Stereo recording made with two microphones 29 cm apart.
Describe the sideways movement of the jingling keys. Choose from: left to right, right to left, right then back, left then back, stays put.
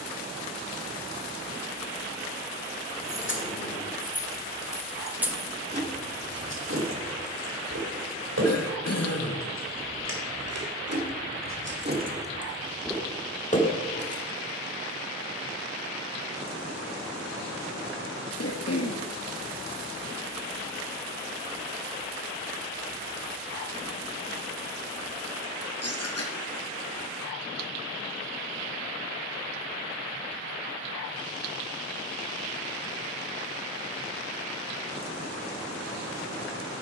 right then back.